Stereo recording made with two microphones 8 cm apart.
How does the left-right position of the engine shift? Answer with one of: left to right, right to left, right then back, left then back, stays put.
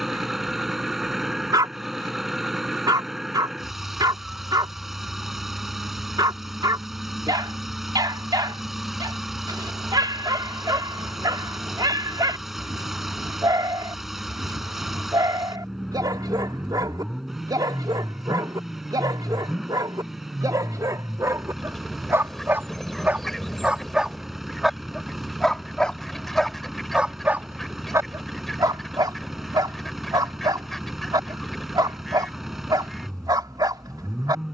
stays put.